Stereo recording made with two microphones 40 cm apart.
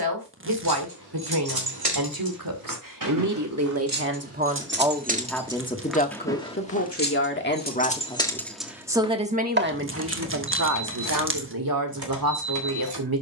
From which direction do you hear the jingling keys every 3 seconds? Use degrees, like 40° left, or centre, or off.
60° right, 30° right, 10° left, 40° right, 70° right.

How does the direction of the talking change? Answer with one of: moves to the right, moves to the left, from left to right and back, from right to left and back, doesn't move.
from right to left and back.